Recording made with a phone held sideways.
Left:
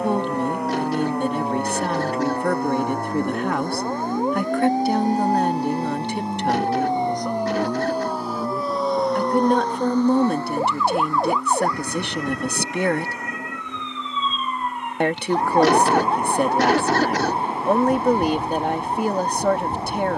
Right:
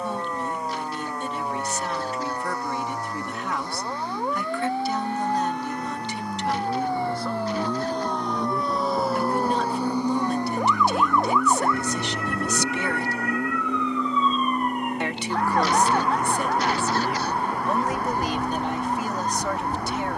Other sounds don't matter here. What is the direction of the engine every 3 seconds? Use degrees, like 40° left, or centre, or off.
70° left, 40° left, 10° left, 10° right, 30° right, 40° right, 50° right.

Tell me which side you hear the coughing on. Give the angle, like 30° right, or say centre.
80° left.